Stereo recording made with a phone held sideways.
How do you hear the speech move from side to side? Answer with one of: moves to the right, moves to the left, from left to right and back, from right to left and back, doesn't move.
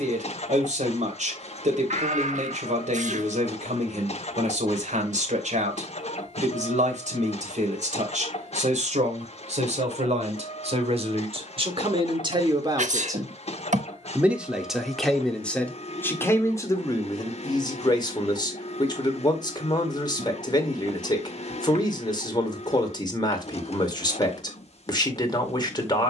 moves to the left.